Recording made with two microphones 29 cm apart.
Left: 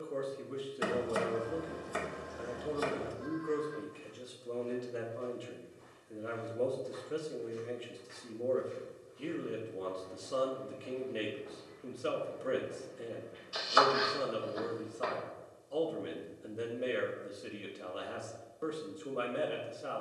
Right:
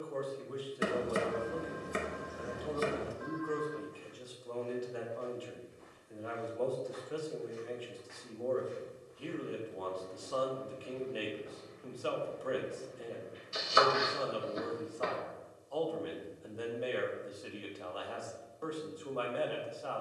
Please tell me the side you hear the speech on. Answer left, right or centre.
left.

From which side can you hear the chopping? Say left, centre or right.
right.